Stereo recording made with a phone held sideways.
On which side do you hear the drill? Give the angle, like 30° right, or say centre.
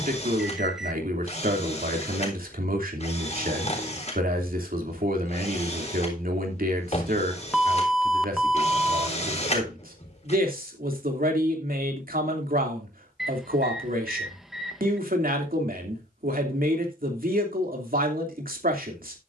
50° left.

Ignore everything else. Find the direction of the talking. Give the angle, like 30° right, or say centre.
80° right.